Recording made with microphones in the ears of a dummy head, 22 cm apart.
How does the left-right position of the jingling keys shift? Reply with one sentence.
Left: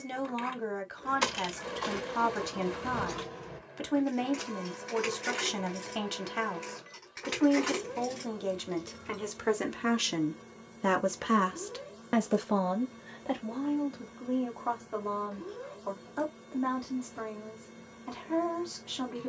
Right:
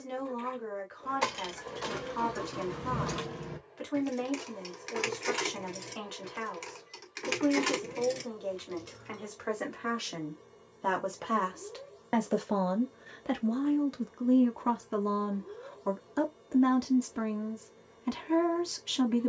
You can hear the jingling keys go right and come back.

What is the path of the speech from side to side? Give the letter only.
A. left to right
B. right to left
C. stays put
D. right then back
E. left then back
A.